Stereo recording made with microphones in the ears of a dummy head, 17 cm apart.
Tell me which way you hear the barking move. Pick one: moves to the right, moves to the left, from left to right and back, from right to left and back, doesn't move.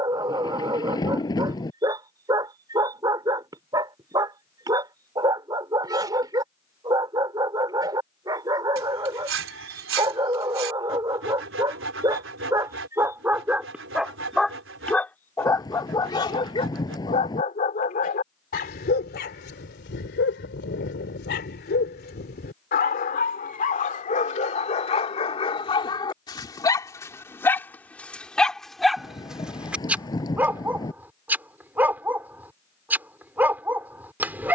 from right to left and back.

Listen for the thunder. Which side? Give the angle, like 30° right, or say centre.
20° left.